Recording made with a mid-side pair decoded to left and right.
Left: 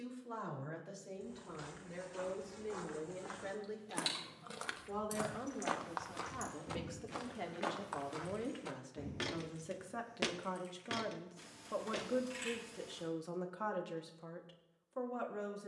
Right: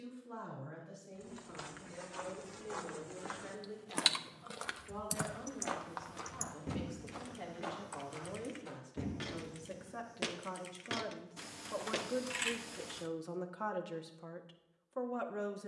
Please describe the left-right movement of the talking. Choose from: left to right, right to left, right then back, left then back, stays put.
left to right.